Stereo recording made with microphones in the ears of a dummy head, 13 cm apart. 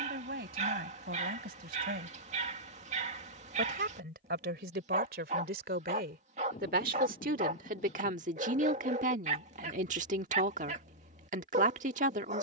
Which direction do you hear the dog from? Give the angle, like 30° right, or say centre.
50° right.